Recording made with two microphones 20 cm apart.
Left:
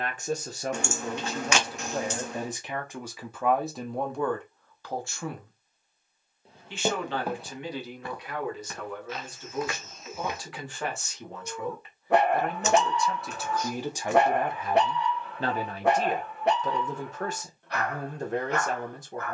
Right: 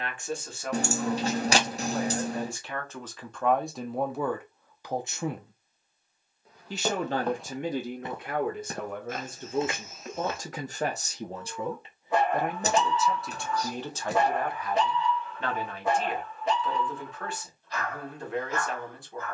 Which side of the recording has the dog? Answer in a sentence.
You can hear the dog on the left.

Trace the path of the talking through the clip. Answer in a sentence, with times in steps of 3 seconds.
In this clip you hear the talking on the left from 0 s, in the centre from 3 s, on the right from 6 s, in the centre from 12 s and on the left from 15 s.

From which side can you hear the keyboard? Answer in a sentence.
In this clip you hear the keyboard on the right.